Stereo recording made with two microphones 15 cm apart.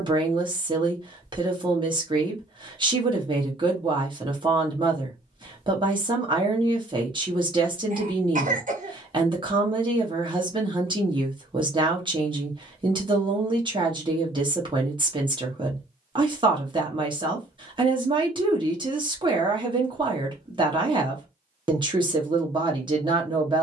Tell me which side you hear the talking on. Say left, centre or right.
right.